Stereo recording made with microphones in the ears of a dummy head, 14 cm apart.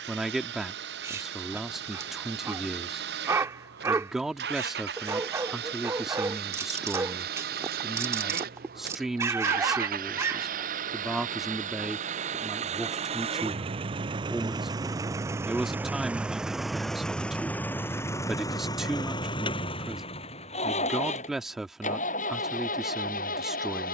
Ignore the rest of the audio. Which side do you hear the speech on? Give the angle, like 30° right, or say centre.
centre.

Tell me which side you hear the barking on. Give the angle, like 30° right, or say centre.
20° right.